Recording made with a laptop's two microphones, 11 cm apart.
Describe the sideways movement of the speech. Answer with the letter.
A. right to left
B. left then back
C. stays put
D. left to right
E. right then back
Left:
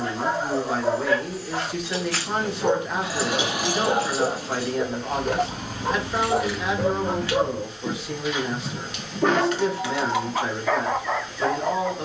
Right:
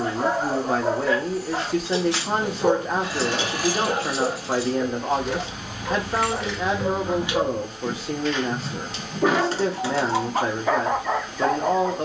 C.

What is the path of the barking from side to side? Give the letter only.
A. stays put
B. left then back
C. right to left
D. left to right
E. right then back
B.